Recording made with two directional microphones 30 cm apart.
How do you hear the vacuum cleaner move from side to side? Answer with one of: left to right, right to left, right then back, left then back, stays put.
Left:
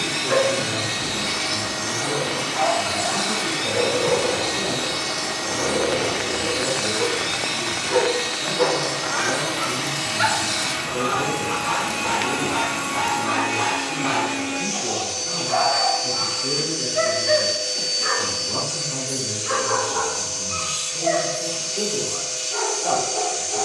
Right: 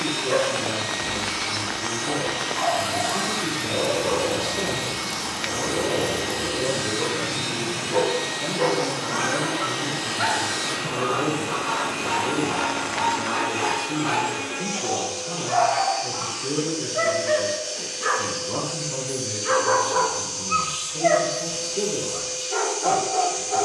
stays put.